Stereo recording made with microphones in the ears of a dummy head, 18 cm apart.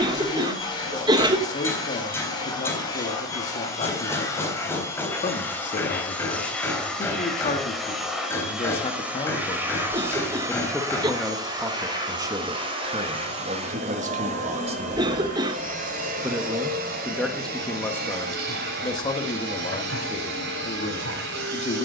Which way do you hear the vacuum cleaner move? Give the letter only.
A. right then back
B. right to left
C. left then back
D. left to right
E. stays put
D.